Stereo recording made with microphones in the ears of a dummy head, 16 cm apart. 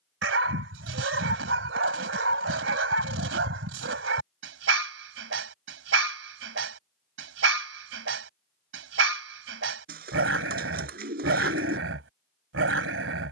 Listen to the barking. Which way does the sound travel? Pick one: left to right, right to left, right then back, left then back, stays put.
stays put.